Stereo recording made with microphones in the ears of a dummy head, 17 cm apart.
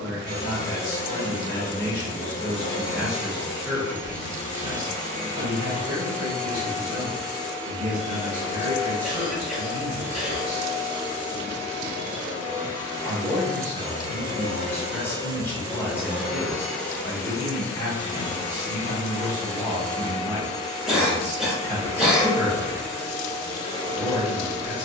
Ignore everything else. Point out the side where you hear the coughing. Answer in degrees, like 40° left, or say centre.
centre.